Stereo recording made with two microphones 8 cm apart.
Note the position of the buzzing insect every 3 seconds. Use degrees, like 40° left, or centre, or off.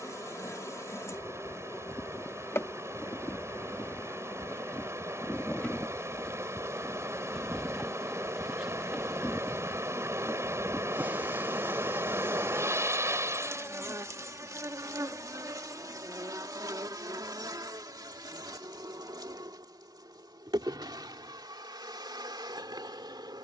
40° left, 20° left, centre, 20° right, 40° right, 50° right, 60° right, 70° right.